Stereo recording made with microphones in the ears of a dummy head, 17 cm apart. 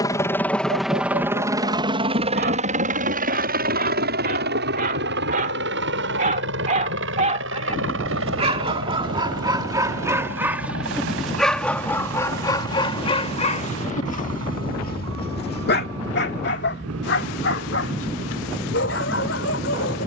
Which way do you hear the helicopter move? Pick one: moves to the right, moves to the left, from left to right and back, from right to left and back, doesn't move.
moves to the right.